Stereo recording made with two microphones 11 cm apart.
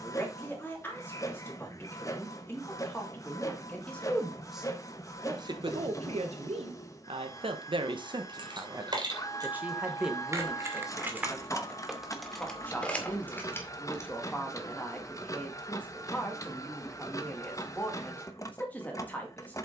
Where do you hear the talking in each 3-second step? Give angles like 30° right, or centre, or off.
20° left, 10° right, 60° right, centre, 10° left, 10° left, 10° left.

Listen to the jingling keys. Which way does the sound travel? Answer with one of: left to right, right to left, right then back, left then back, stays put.
right to left.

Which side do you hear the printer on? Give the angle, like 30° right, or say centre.
30° left.